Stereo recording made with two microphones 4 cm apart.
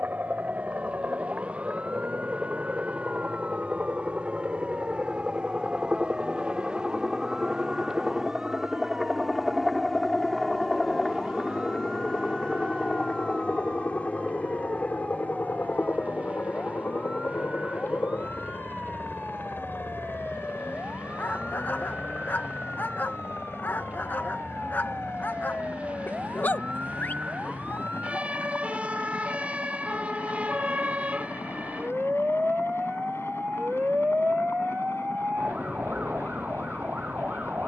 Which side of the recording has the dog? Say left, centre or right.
left.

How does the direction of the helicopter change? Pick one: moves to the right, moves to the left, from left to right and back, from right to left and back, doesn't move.
moves to the left.